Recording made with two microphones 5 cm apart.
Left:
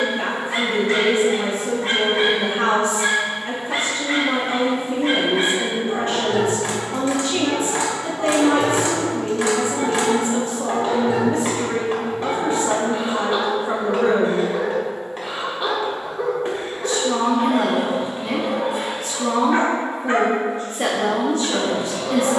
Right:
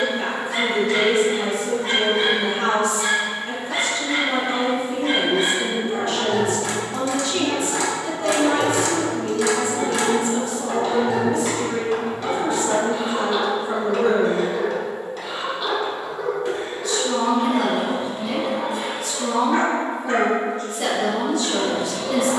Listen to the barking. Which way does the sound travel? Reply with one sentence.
You can hear the barking stay put.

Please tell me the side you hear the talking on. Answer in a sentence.
You can hear the talking on the left.